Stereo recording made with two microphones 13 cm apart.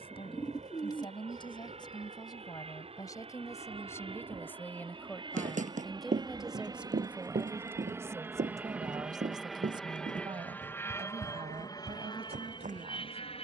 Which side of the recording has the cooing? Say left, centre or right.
left.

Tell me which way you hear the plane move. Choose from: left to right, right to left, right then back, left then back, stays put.
right to left.